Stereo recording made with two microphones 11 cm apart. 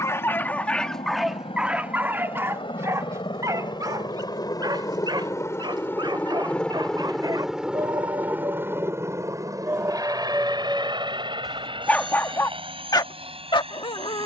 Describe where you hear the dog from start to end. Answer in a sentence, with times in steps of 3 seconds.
You can hear the dog in the centre from 0 s, on the right from 3 s, in the centre from 9 s and on the left from 12 s.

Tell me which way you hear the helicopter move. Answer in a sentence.
You can hear the helicopter go from the left side to the right.